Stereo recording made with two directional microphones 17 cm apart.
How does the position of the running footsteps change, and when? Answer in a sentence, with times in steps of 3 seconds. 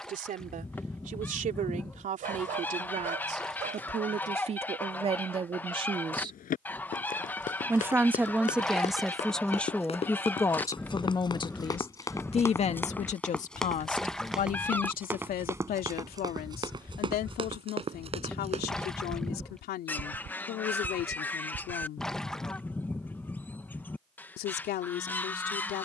You can hear the running footsteps not at all from 0 s, on the left from 6 s, in the centre from 12 s, on the right from 15 s and not at all from 24 s.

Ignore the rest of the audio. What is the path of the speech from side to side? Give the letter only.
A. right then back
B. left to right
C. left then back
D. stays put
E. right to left
E.